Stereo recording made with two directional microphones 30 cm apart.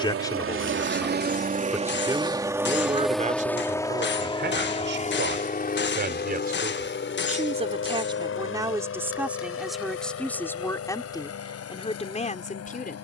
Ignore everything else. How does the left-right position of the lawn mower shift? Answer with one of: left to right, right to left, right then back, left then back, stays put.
right to left.